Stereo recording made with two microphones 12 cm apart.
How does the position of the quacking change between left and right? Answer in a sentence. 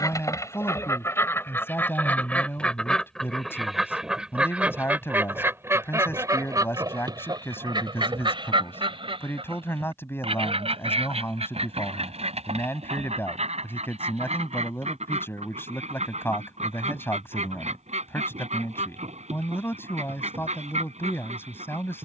You can hear the quacking move to the right.